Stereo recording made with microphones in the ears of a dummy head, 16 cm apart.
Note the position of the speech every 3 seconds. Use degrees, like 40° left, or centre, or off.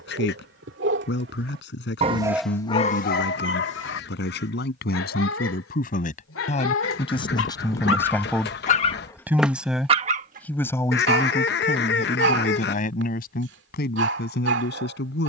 70° left, 60° left, 30° left, 10° left, 60° left.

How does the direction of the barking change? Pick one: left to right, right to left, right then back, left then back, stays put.
left then back.